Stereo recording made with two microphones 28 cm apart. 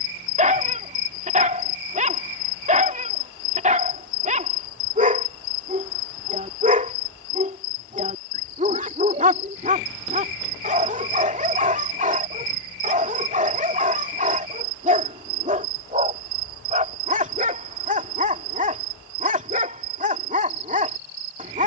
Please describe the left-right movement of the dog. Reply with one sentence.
You can hear the dog stay put.